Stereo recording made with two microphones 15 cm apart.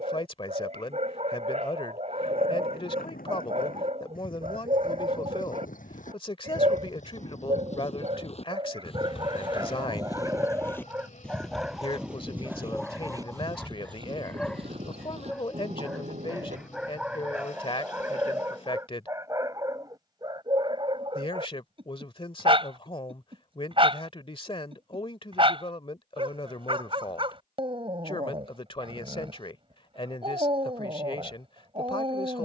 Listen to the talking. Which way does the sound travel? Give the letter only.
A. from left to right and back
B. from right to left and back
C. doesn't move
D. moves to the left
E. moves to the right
C.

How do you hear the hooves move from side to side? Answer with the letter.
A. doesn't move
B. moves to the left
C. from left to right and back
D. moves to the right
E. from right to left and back
D.